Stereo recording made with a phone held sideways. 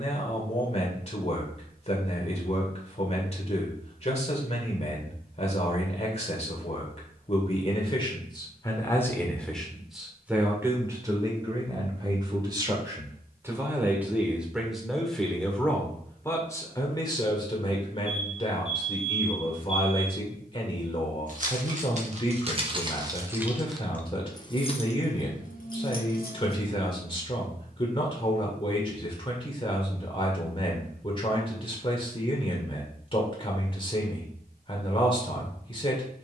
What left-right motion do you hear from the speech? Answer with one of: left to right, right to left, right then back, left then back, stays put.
right then back.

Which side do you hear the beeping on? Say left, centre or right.
right.